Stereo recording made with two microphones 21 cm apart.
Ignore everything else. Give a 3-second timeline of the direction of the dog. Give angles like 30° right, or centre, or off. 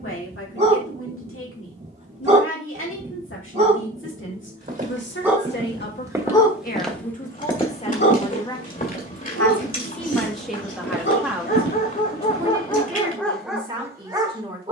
30° right, 20° right, 40° left, 60° left, 10° left.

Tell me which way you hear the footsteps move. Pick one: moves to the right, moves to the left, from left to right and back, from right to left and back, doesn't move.
moves to the left.